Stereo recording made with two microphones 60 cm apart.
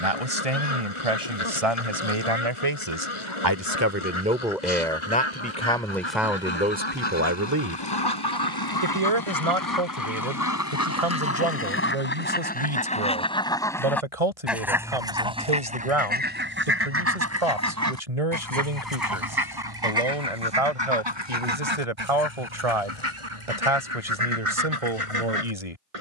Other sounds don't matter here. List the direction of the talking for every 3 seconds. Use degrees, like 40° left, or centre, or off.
60° right, 10° right, 20° right, 60° right, 70° right, 70° right, 70° right, 70° right, 70° right.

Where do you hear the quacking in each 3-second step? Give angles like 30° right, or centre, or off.
50° left, 50° left, 40° left, 30° left, 10° left, 20° right, 40° right, 50° right, 60° right.